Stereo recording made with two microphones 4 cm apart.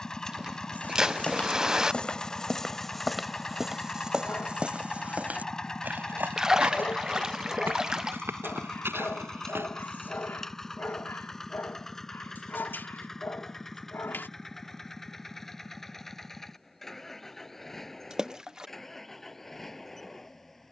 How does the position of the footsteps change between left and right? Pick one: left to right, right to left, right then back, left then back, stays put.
left to right.